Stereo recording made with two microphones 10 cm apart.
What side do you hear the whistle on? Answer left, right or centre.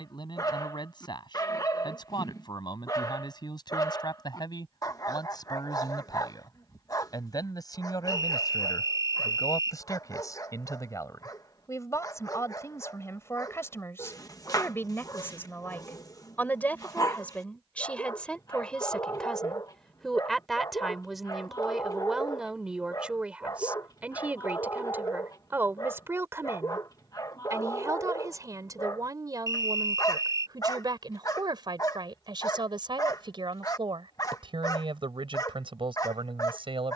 right.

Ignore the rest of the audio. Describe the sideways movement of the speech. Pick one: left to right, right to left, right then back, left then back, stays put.
left to right.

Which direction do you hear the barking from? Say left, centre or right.
left.